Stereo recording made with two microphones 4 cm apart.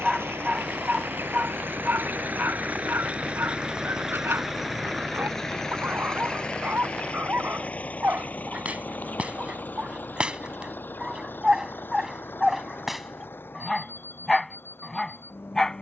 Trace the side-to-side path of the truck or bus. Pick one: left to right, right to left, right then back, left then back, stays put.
right to left.